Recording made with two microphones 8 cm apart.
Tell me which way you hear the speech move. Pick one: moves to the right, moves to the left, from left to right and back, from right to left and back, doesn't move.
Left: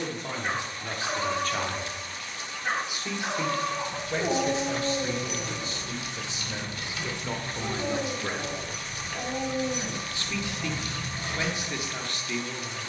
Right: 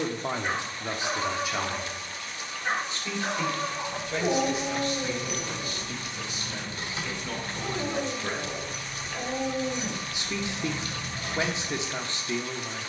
from right to left and back.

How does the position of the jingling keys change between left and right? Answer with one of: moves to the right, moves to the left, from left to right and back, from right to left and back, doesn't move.
moves to the left.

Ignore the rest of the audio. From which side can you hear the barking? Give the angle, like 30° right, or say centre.
centre.